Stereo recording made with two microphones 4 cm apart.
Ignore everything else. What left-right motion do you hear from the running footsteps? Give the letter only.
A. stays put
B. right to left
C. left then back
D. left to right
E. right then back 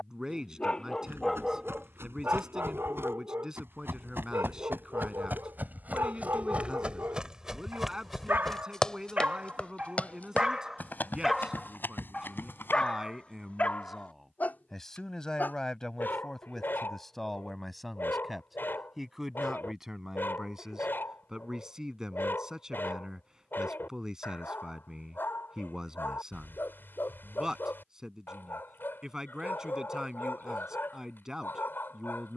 B.